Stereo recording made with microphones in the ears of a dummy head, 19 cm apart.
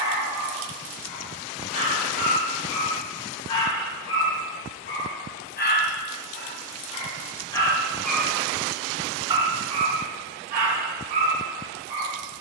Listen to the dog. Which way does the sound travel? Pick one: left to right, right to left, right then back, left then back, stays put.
left to right.